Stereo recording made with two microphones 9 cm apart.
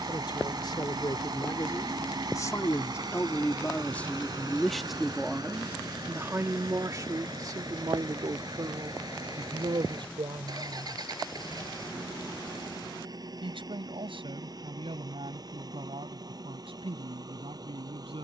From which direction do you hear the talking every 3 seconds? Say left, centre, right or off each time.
left, centre, right, right, right, right.